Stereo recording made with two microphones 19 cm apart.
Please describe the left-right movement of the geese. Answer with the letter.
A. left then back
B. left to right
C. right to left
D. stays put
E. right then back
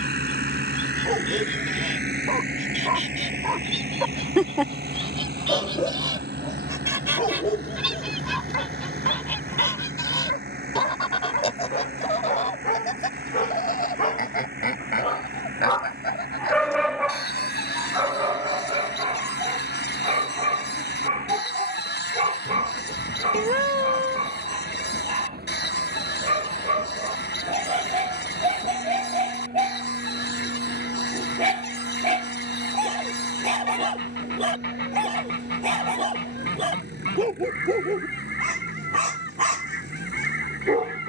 C.